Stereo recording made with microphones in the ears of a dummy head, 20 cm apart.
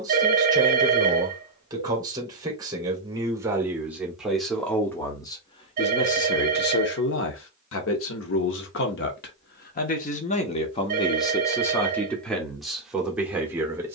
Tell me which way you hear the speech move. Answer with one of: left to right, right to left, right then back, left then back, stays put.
left then back.